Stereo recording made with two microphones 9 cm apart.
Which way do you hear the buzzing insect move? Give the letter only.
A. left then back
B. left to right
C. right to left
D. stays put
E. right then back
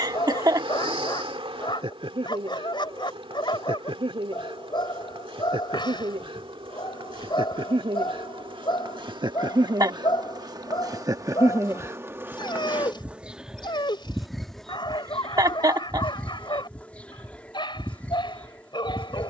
C.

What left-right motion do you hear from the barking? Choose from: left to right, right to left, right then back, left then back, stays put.
stays put.